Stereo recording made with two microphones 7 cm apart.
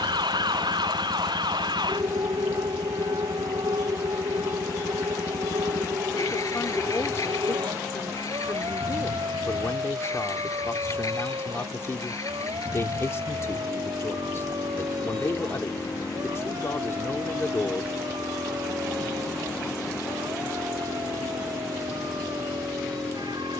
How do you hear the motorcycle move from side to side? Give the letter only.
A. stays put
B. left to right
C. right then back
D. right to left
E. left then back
A.